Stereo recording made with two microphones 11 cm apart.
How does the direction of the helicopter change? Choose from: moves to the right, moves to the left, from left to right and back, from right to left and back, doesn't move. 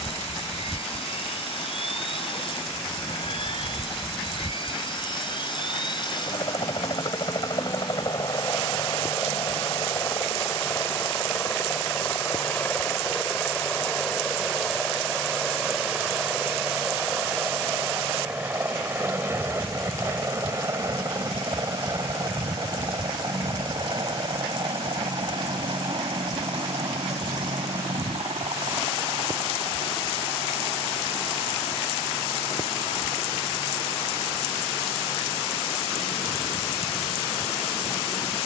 moves to the right.